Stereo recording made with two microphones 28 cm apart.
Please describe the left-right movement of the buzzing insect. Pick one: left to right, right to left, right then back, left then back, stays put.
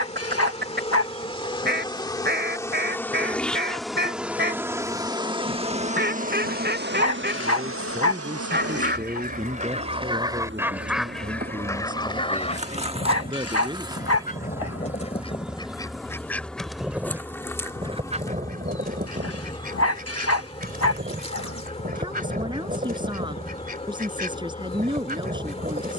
right then back.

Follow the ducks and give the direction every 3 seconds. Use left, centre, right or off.
right, right, right, centre, left, centre, right, right, right.